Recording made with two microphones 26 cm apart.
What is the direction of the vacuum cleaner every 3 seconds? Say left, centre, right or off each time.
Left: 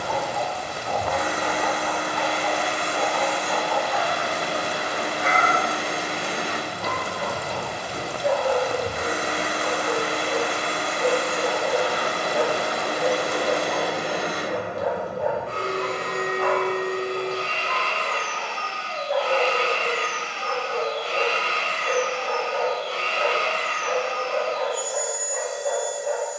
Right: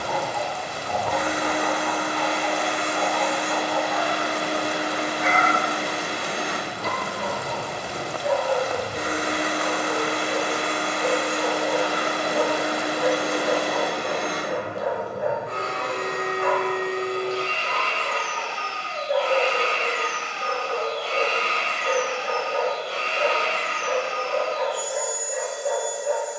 right, right, right, right, centre, left, left, centre, right.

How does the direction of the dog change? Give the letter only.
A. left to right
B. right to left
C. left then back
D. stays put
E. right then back
A.